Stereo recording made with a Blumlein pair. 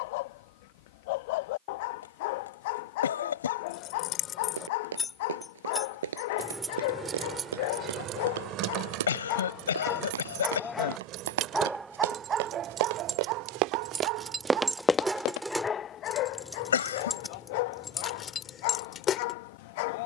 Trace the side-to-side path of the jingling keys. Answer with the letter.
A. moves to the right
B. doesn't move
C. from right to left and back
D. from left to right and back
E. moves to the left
D.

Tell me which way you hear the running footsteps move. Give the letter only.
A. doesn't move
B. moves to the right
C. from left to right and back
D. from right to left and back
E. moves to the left
E.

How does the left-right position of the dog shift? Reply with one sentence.
You can hear the dog go right and come back.